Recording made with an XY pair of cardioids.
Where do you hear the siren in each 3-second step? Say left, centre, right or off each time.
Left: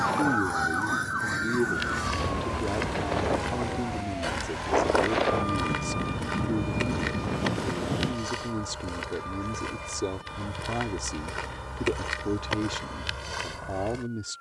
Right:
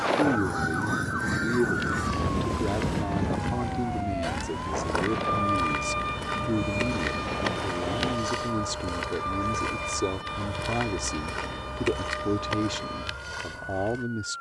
centre, right, right, right, right.